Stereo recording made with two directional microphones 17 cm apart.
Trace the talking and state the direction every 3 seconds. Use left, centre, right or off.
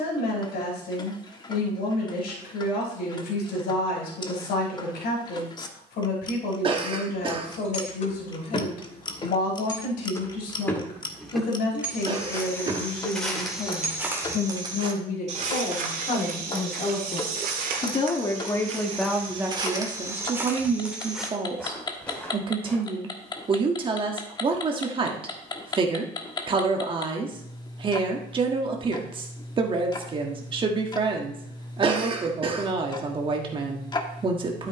left, left, left, left, left, left, centre, right, right, right, right, right.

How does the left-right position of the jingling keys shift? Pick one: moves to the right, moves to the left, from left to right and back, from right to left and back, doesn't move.
moves to the right.